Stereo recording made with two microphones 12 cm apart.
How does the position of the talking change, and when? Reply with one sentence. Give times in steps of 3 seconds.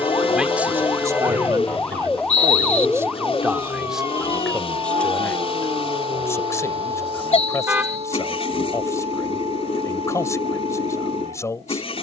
In this clip you hear the talking on the right from 0 s, in the centre from 3 s and on the left from 6 s.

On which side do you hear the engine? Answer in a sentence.
You can hear the engine on the left.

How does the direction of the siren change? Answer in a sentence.
In this clip you hear the siren move to the right.